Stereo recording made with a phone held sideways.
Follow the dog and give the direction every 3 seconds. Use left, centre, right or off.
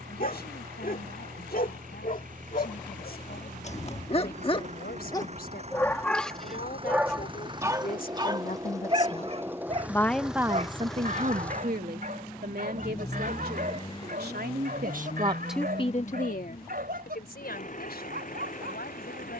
left, left, centre, right, right, right, right.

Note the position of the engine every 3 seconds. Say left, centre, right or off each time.
right, right, right, centre, left, left, left.